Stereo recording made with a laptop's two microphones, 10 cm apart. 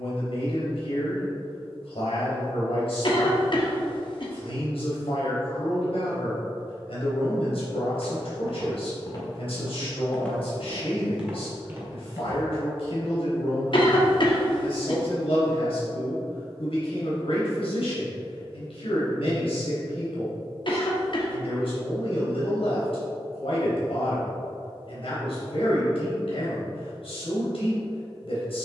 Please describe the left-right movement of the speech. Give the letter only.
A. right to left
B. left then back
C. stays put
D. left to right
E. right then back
C.